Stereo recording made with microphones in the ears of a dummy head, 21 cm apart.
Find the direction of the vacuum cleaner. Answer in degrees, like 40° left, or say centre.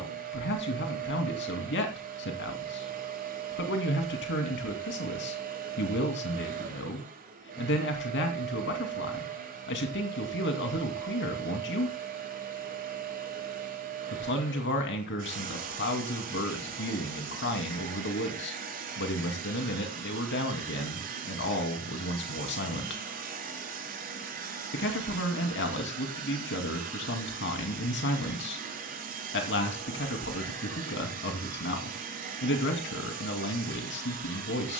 40° right.